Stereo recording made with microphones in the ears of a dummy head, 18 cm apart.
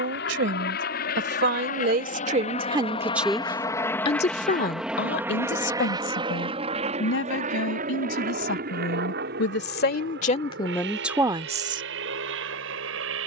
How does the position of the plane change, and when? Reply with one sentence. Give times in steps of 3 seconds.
In this clip you hear the plane on the left from 0 s, in the centre from 3 s and on the right from 6 s.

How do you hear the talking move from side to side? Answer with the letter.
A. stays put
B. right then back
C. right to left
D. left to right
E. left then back
E.